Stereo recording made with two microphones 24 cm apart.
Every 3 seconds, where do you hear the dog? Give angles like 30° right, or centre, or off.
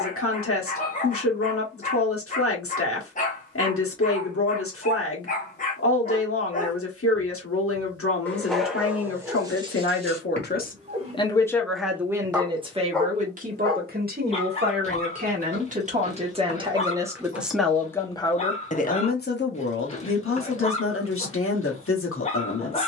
30° left, 30° left, 10° left, 20° right, 10° left, 30° left, 30° left, 30° left.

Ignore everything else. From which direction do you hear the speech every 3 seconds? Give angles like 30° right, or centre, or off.
70° left, 70° left, 70° left, 40° left, 30° right, 20° right, 50° left, 60° left.